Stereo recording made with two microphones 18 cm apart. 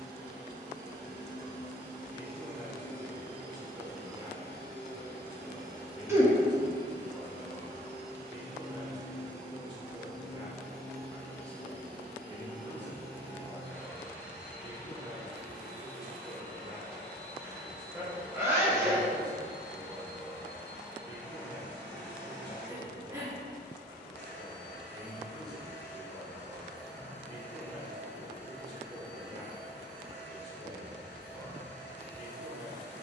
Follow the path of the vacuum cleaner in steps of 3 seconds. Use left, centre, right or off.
right, right, right, centre, centre, centre, centre, centre, centre, centre, centre.